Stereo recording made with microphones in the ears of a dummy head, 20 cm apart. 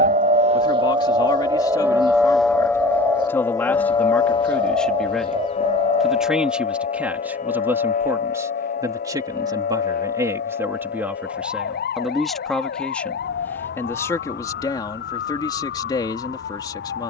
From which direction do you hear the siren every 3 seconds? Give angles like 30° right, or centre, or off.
20° right, 20° left, 40° left, 50° left, 50° left, 50° left.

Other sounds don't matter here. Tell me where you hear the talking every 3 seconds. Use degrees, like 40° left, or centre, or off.
20° left, 10° left, 10° right, 10° right, 10° left, 20° left.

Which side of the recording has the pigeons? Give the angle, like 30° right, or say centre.
20° right.